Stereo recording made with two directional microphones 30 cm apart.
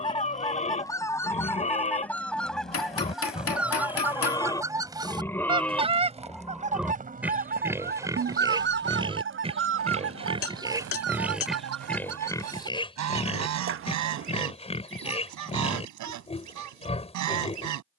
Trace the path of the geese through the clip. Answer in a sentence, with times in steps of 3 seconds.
You can hear the geese in the centre from 0 s and on the right from 6 s.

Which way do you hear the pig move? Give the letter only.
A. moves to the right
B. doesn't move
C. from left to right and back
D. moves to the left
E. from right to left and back
C.